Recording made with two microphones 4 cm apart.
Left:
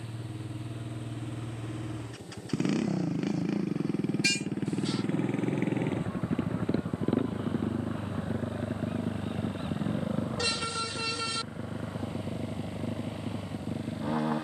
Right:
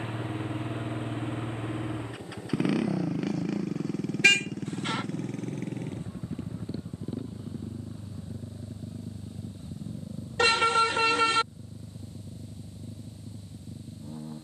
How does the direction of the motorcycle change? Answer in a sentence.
In this clip you hear the motorcycle move from right to left.